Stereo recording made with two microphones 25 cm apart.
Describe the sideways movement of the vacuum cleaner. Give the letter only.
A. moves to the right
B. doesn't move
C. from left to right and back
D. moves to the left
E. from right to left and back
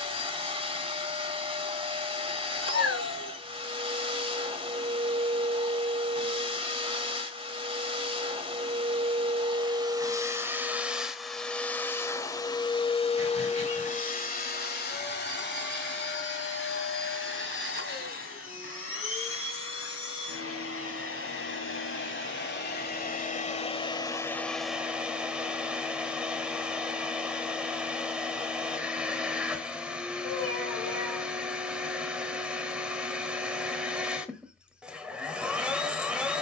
E.